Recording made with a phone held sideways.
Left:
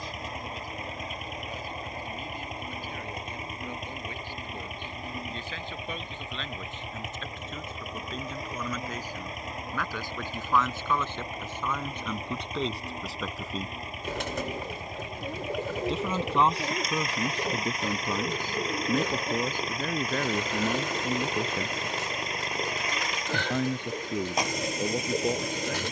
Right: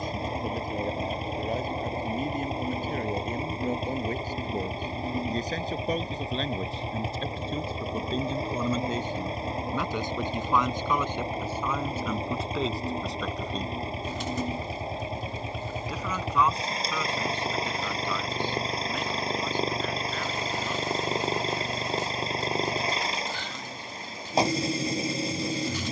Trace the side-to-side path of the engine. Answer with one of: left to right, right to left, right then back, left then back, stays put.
stays put.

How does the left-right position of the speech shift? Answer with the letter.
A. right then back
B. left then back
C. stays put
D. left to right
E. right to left
E.